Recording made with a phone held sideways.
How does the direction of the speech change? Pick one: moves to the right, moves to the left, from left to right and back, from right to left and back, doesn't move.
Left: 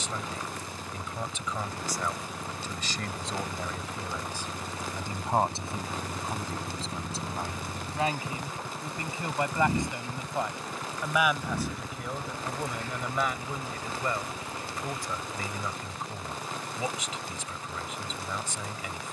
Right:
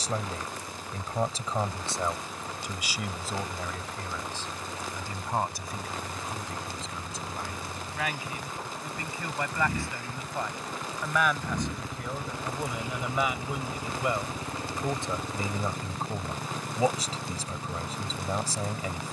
from right to left and back.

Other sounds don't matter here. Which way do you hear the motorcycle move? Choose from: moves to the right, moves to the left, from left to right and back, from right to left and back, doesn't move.
moves to the right.